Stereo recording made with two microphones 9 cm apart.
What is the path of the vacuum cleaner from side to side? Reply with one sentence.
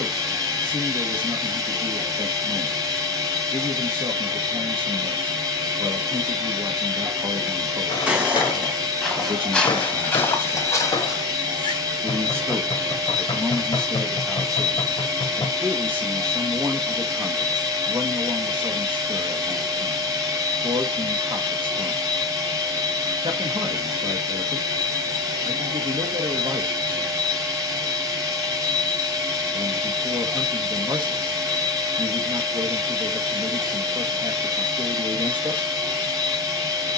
You can hear the vacuum cleaner stay in one place.